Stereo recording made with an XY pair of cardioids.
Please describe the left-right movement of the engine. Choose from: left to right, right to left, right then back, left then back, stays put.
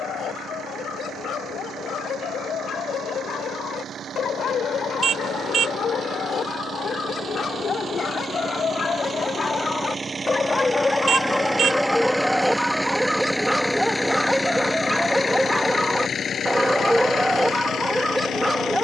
right to left.